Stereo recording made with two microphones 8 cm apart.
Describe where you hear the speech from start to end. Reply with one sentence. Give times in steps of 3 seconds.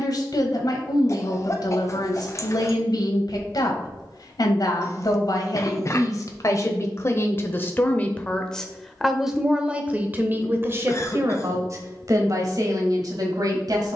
You can hear the speech on the left from 0 s and on the right from 9 s.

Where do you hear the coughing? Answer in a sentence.
In this clip you hear the coughing on the left.